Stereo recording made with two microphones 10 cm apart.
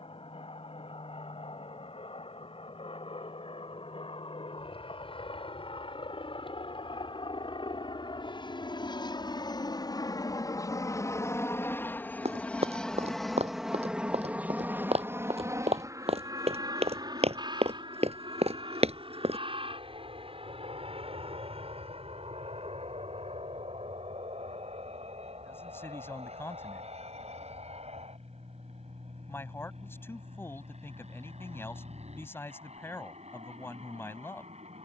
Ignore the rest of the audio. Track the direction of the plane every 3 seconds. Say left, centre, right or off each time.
left, left, left, left, centre, right, right, right, right, right, right, right.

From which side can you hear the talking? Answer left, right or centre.
left.